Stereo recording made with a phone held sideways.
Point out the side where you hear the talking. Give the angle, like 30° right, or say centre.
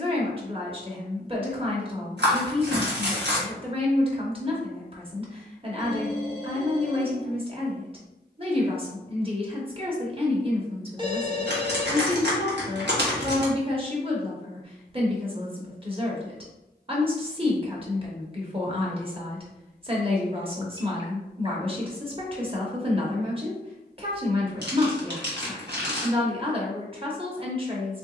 30° right.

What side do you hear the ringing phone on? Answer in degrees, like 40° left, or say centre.
30° right.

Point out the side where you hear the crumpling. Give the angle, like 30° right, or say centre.
80° right.